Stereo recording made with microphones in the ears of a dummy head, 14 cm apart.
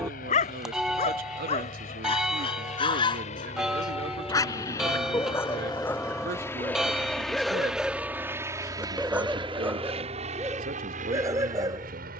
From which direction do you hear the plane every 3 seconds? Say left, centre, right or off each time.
left, left, centre, right.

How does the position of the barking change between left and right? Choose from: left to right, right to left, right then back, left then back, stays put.
left to right.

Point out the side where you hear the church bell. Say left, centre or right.
centre.